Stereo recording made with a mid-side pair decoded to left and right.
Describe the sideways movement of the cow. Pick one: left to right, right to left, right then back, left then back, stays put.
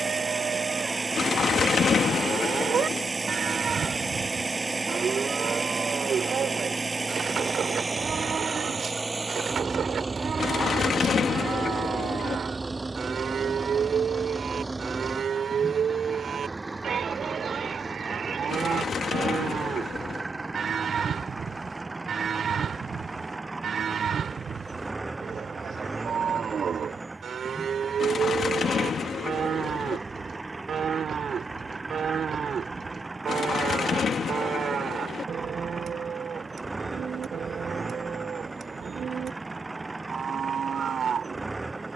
stays put.